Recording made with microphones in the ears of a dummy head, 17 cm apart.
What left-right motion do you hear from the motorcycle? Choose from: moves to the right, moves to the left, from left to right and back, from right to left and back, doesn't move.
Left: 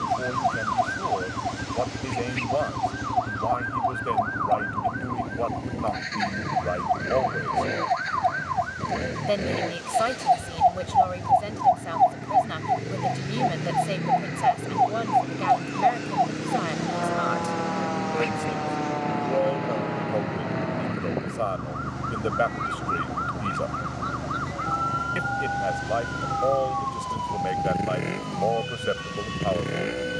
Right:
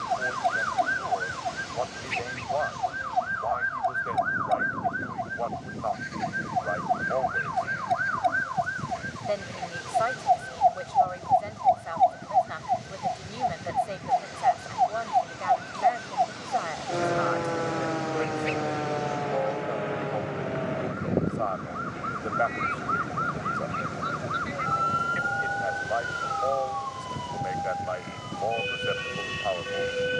doesn't move.